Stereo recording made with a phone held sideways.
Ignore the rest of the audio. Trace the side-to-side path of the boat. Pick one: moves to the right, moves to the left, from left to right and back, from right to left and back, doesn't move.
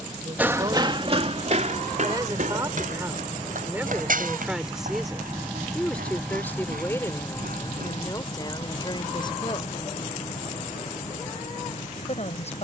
moves to the left.